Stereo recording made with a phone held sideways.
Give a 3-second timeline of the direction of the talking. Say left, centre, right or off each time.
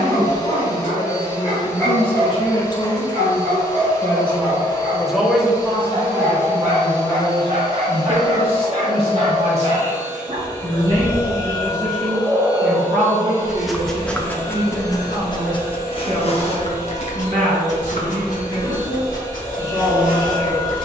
left, centre, right, right, right, right, right.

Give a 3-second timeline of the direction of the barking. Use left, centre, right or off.
right, right, right, right, centre, left, left.